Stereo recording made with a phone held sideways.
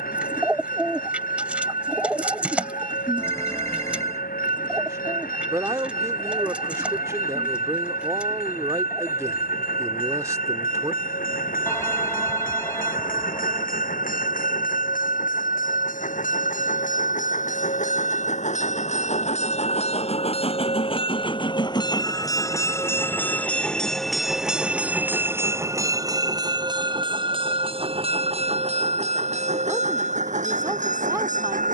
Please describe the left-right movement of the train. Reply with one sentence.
In this clip you hear the train travel towards the right.